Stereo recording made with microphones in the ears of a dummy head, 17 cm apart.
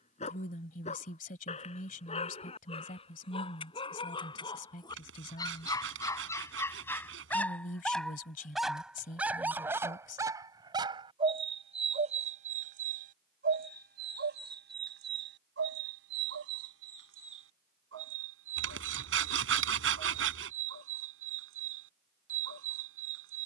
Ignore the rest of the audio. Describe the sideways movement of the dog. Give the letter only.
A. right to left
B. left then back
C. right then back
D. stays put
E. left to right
E.